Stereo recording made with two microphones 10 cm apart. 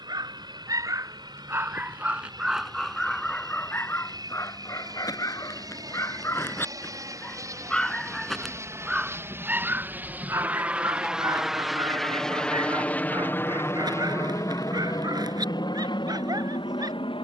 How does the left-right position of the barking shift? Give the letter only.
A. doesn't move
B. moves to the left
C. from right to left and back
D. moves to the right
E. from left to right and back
C.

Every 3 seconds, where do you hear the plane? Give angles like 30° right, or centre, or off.
50° right, 50° right, 40° right, 10° right, 20° left, 50° left.